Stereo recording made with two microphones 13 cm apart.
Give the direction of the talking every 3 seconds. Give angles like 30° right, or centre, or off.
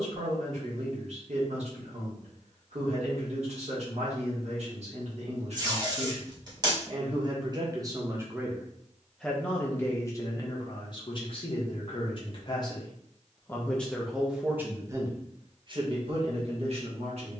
60° right, 60° right, 30° right, 30° left, 10° left, 50° right.